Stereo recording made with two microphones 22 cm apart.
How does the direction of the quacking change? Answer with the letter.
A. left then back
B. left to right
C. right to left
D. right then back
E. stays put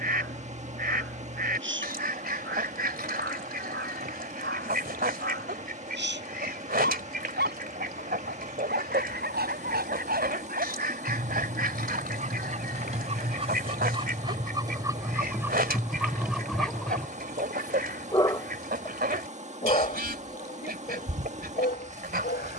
E.